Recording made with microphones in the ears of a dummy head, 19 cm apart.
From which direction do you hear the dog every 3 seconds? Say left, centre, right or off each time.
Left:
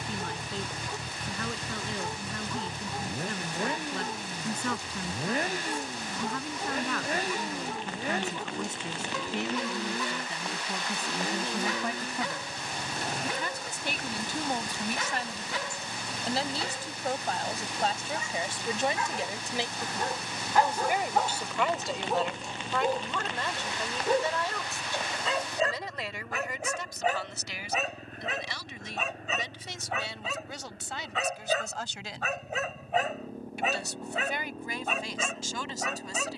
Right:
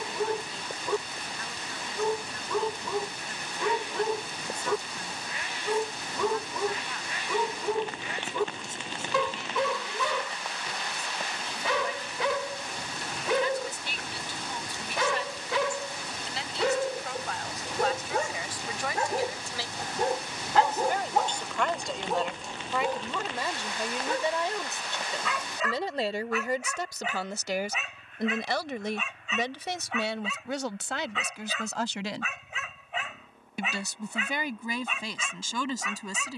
right, right, right, right, right, right, right, centre, left, left, left, left.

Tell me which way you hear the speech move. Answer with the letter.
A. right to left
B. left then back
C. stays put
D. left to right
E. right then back
D.